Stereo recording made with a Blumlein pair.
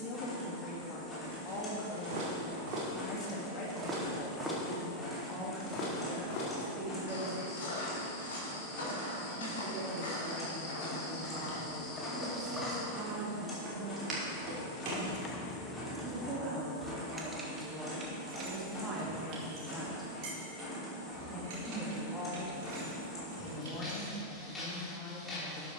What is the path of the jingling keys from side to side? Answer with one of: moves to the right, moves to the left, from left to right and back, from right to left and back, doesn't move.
moves to the right.